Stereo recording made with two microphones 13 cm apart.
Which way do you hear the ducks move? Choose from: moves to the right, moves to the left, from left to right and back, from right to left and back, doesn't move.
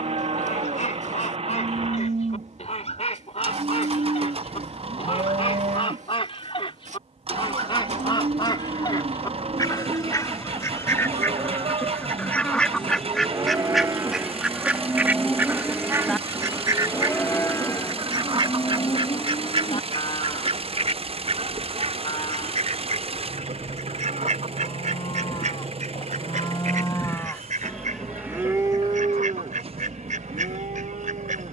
moves to the right.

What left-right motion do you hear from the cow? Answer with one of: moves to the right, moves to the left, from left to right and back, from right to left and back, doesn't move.
from right to left and back.